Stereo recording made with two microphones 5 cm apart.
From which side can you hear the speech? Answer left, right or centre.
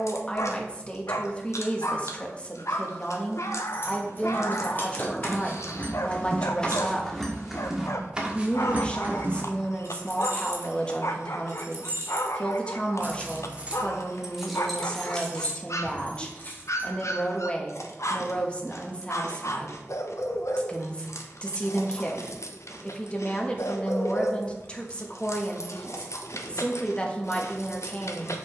left.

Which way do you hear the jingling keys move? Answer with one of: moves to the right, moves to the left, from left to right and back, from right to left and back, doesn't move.
from left to right and back.